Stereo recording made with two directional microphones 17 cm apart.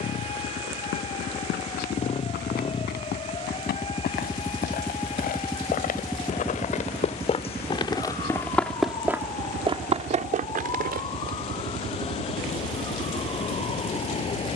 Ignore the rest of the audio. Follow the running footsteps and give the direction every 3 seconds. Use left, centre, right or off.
left, left, left, right, off.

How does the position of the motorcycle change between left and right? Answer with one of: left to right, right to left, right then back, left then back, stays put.
left to right.